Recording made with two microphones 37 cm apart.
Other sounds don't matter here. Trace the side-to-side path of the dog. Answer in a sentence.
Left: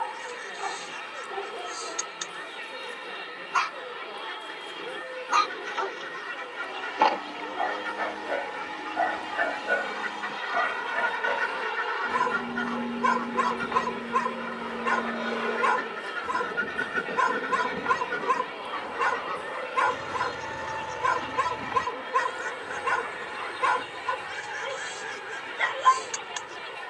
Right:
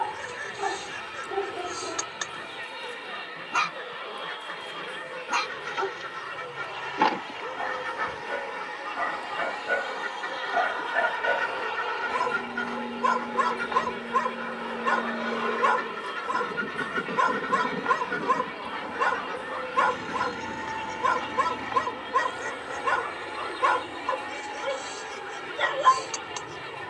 In this clip you hear the dog go from the right side to the left.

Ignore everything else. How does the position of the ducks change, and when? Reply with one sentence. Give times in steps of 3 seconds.
You can hear the ducks on the right from 0 s, in the centre from 15 s and on the left from 21 s.